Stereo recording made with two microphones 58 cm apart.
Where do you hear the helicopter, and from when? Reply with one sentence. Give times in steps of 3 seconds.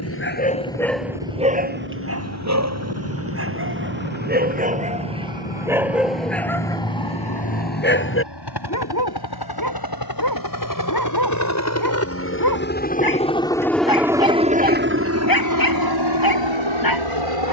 You can hear the helicopter on the left from 0 s, in the centre from 12 s and on the right from 15 s.